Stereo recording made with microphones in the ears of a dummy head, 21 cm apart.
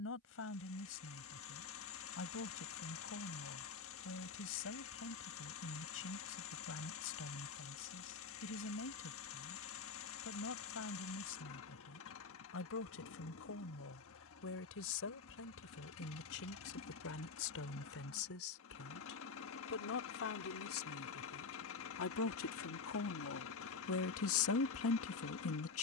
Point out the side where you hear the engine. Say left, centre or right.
left.